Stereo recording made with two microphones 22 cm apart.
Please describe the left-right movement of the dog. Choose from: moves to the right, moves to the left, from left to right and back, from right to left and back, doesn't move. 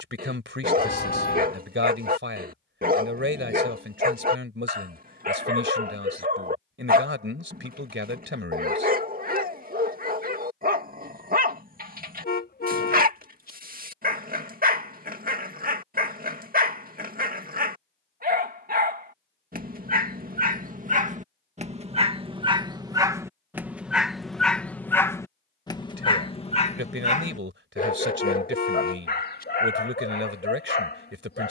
moves to the left.